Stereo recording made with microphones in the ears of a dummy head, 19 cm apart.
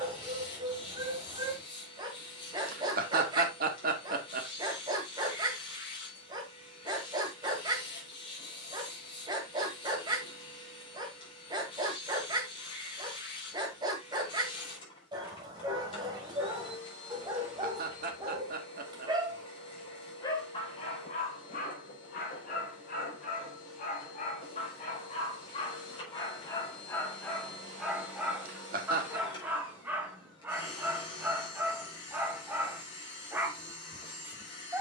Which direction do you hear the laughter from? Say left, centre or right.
right.